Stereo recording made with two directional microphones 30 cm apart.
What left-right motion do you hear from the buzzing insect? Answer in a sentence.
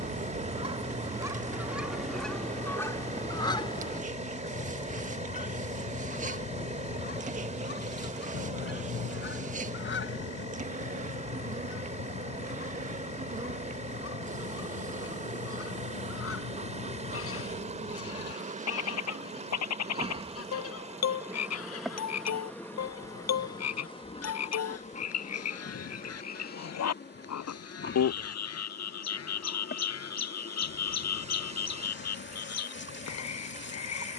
In this clip you hear the buzzing insect move from right to left.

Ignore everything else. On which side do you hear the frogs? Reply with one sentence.
You can hear the frogs on the left.